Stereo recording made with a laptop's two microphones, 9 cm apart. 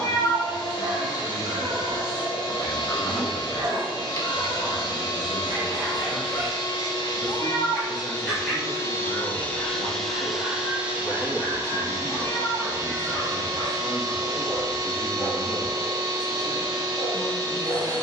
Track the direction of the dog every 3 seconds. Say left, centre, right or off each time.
right, right, centre, left, left, left.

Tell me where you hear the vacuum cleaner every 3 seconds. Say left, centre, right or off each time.
left, left, left, centre, right, right.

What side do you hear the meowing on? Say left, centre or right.
left.